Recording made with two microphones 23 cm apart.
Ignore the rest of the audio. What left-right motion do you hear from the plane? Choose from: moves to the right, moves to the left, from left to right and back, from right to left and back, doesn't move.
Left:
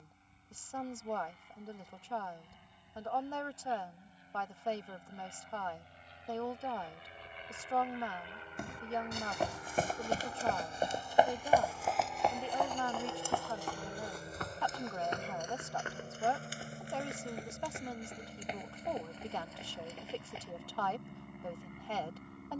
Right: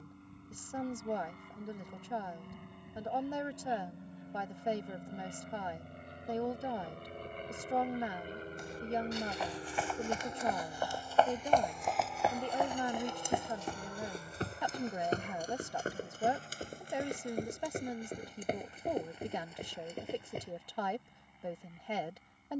moves to the left.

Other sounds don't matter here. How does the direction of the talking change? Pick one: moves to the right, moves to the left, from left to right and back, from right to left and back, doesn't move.
doesn't move.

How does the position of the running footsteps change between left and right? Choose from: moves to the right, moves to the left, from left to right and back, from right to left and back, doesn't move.
moves to the right.